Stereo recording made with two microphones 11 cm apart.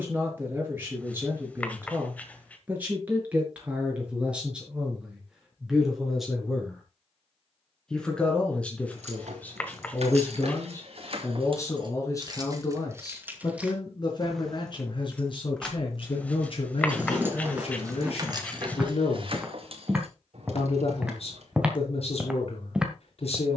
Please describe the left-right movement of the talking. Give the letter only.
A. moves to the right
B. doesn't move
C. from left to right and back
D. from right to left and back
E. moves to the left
E.